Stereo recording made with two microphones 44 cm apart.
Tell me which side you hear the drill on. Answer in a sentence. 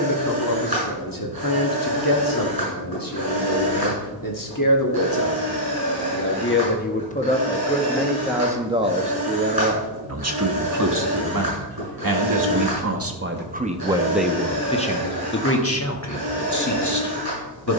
In this clip you hear the drill on the right.